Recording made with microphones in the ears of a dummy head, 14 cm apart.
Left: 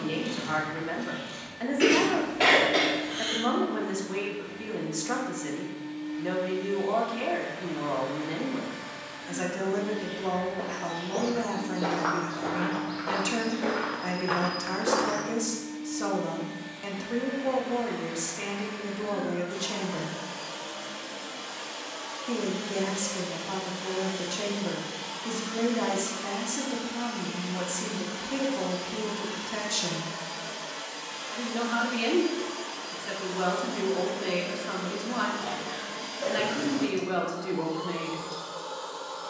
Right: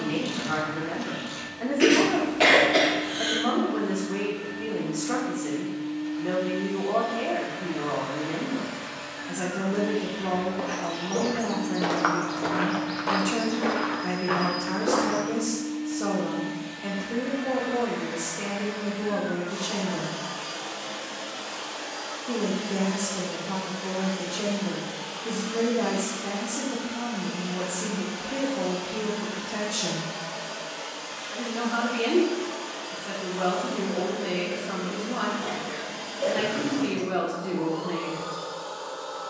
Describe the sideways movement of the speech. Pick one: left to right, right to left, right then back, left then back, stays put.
stays put.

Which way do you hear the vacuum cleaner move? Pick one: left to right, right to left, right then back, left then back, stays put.
right to left.